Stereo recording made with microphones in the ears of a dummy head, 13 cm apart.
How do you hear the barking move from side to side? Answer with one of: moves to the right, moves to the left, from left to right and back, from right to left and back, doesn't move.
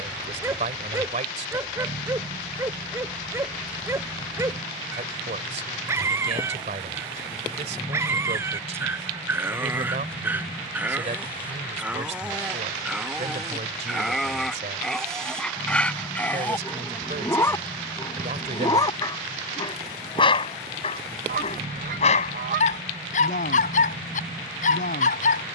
moves to the left.